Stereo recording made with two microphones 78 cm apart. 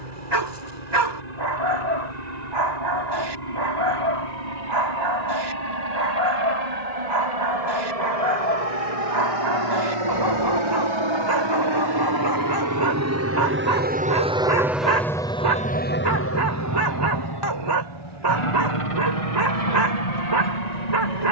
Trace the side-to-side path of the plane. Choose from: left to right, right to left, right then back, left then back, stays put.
right to left.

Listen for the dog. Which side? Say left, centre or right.
right.